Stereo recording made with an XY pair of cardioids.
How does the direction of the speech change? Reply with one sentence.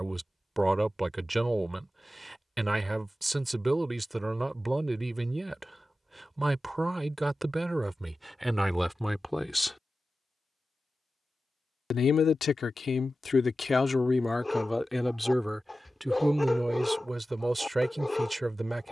In this clip you hear the speech move from right to left and back again.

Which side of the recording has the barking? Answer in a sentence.
In this clip you hear the barking in the centre.